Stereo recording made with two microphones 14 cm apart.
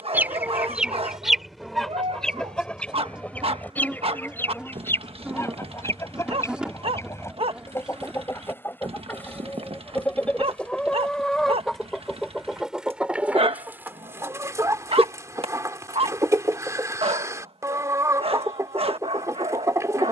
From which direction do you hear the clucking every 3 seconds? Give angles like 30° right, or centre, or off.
centre, 10° left, 20° left, 10° left, 10° right, 20° right, 20° right.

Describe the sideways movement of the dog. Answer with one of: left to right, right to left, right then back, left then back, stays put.
stays put.